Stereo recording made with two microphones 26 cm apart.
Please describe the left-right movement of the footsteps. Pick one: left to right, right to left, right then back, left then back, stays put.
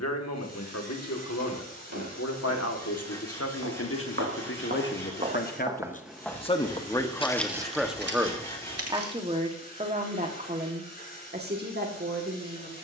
left then back.